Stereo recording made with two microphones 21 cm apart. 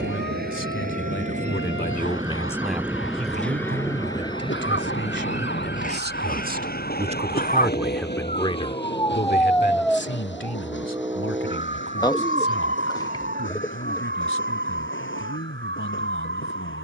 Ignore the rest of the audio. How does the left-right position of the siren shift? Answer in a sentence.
You can hear the siren move to the right.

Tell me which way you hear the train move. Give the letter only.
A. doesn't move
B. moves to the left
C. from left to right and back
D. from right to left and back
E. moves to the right
B.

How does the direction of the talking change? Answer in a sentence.
You can hear the talking move from left to right and back again.